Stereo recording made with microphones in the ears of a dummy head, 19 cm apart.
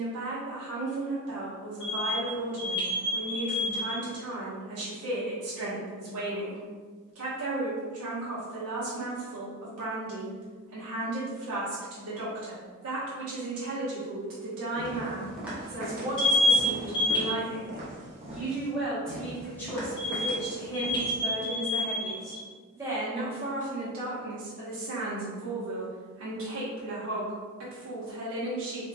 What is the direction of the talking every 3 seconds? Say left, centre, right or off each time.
right, right, right, right, right, right, centre, centre, right, right.